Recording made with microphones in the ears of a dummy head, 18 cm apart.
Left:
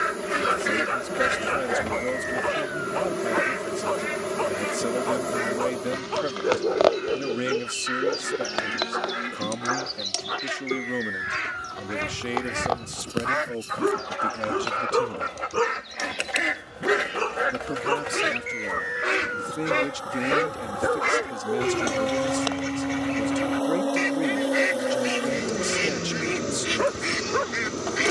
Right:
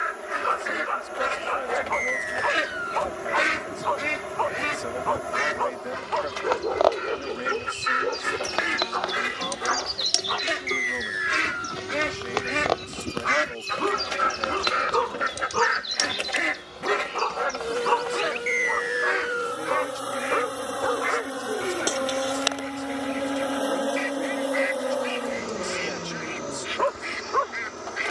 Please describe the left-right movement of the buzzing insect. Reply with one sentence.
In this clip you hear the buzzing insect go right and come back.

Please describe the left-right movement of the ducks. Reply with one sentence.
You can hear the ducks go right and come back.